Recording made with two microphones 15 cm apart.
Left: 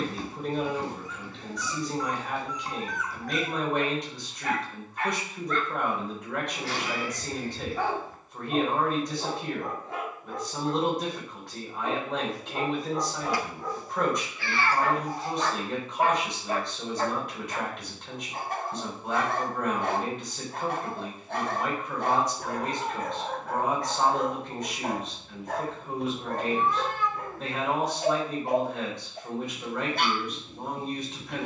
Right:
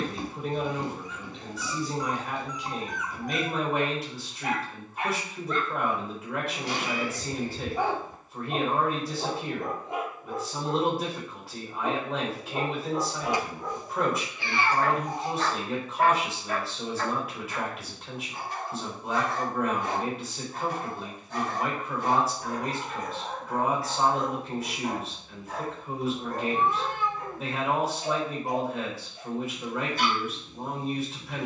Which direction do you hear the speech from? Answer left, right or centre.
centre.